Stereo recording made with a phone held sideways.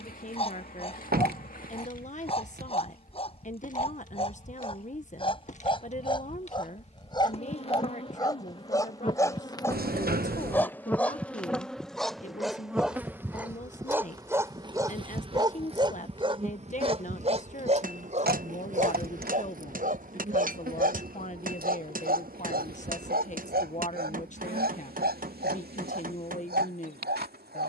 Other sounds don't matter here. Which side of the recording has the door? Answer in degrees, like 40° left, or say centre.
70° right.